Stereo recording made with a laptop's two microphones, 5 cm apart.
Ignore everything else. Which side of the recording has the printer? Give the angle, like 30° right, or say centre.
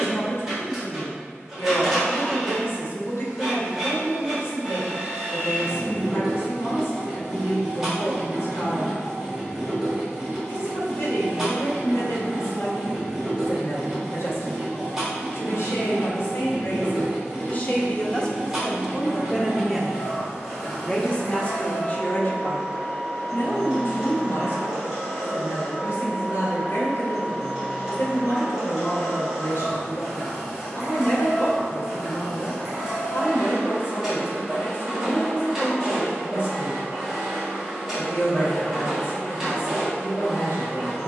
10° right.